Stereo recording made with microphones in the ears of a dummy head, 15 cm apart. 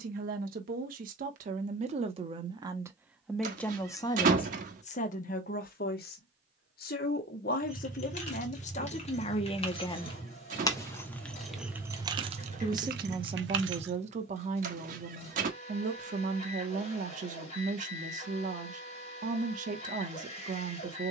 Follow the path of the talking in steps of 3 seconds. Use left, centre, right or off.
right, left, left, left, right, right, right.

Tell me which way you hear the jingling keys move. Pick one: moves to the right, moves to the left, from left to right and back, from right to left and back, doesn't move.
moves to the right.